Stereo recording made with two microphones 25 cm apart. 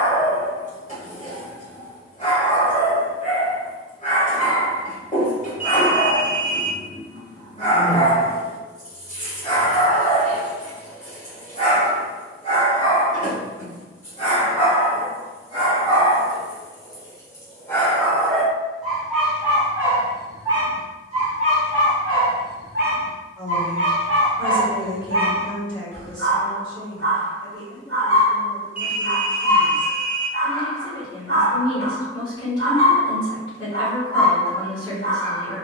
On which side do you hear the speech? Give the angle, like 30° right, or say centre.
20° left.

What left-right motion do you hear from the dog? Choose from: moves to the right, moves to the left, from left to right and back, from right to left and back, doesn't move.
moves to the right.